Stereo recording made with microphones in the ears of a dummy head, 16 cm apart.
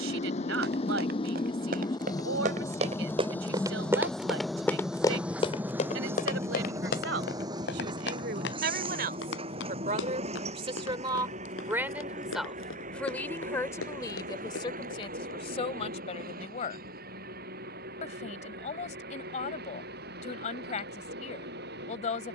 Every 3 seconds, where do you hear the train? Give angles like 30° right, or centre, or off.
20° left, centre, 20° right, 30° right, 40° right, 50° right, 50° right, 50° right.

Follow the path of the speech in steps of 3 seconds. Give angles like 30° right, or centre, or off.
70° right, 70° right, 60° right, 30° right, 10° left, 30° left, 40° left, 40° left.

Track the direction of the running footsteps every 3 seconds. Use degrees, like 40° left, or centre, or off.
50° right, centre, 60° left, 80° left, 80° left, off, off, off.